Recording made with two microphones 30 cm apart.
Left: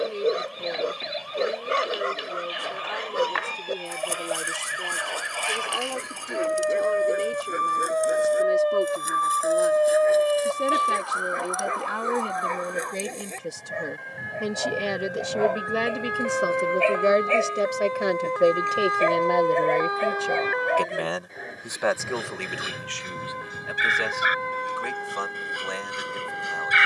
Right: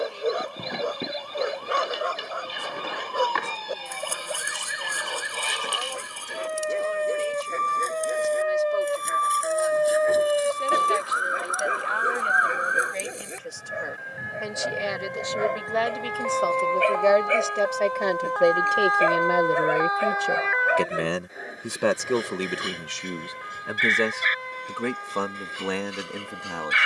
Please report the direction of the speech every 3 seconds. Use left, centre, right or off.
left, left, left, left, left, left, centre, right, right.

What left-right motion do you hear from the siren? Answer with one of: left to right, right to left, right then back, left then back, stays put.
right to left.